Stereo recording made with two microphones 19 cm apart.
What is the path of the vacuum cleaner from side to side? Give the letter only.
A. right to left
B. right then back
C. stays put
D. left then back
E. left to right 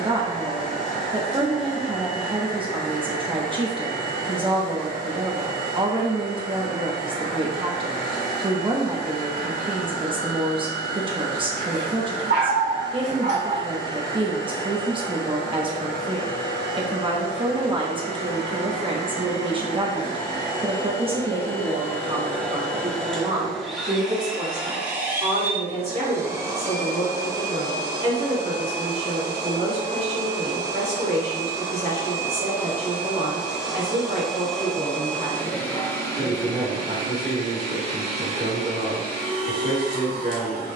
B.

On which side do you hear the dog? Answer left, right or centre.
right.